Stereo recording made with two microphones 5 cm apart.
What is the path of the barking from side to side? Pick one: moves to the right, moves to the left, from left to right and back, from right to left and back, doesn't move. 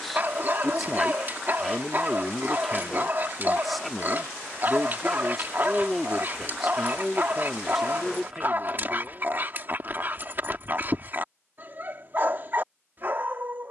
doesn't move.